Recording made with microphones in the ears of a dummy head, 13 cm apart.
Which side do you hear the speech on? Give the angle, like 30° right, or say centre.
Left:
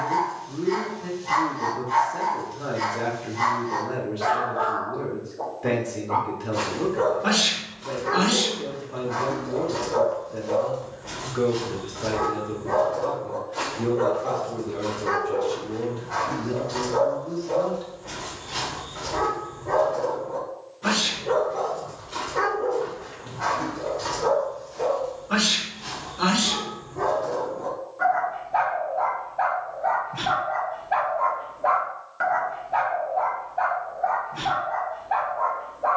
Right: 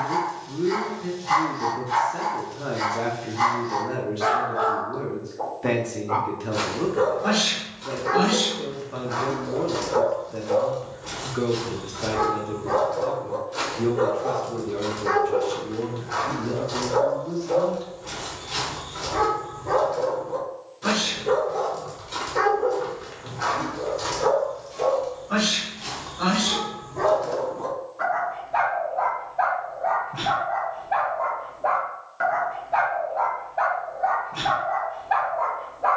10° right.